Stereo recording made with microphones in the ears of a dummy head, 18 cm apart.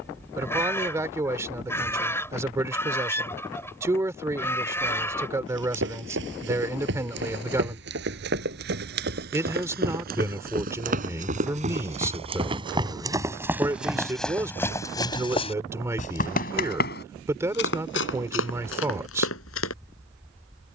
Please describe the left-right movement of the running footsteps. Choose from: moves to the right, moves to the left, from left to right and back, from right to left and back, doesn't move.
moves to the left.